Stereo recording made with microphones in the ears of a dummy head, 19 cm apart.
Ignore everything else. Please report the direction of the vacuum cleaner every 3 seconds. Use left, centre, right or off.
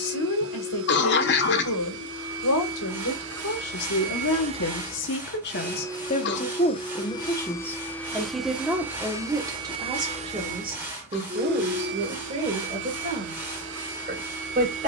right, right, centre, right, right.